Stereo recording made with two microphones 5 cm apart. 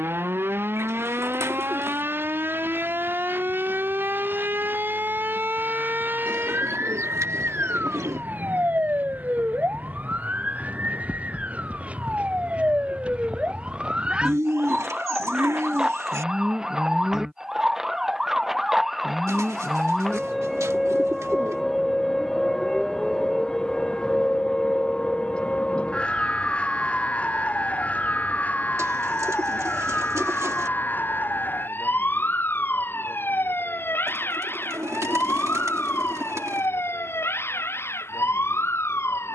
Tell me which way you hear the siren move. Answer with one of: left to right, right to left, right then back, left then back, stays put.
right to left.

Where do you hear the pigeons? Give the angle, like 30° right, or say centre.
80° right.